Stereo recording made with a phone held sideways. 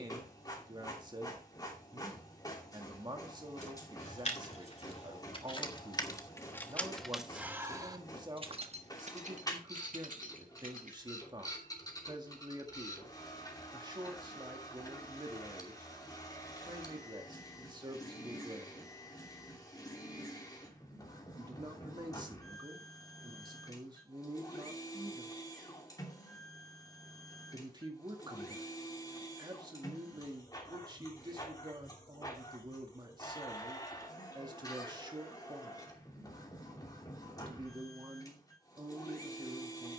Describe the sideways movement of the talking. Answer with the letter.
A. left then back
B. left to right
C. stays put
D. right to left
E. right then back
C.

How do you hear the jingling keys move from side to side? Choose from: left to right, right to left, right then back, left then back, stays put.
left to right.